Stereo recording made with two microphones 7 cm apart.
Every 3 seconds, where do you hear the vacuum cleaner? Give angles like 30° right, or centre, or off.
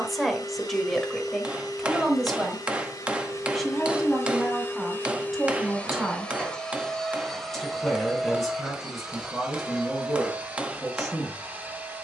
60° left, 40° left, centre, 20° right.